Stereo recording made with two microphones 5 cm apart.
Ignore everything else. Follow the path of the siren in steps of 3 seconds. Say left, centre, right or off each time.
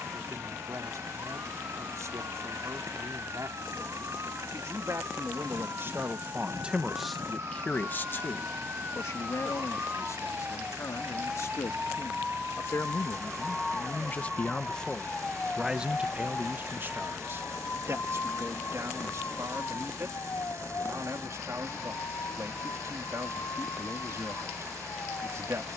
right, right, right, right, centre, left, left, left, left.